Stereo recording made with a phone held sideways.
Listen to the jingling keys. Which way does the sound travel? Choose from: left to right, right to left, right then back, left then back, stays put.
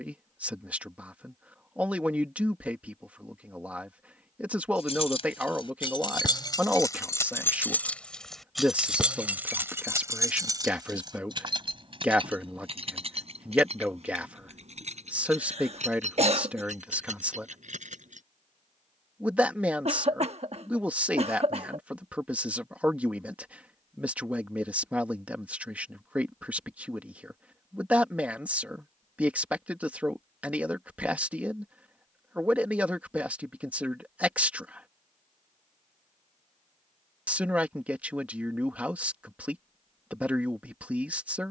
left to right.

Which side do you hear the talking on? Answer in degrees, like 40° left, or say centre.
10° right.